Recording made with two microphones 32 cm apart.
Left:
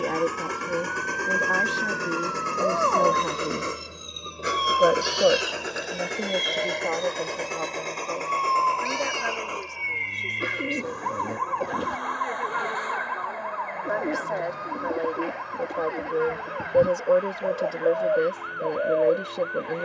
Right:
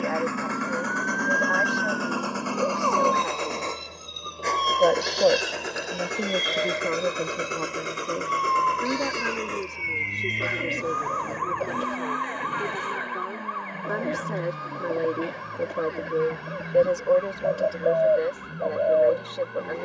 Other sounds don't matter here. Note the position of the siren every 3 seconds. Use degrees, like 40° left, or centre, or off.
50° right, 20° right, 20° left, 50° left, 60° left, 60° left, 70° left.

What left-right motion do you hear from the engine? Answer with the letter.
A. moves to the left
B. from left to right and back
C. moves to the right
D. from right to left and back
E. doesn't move
C.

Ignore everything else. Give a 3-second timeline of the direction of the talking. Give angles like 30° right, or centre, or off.
50° left, 20° left, 30° right, 50° right, 50° right, centre, 40° left.